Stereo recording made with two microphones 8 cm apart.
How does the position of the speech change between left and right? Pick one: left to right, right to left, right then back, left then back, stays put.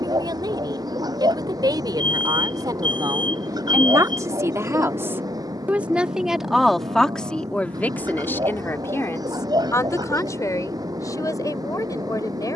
right to left.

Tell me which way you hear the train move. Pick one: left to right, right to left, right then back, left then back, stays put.
stays put.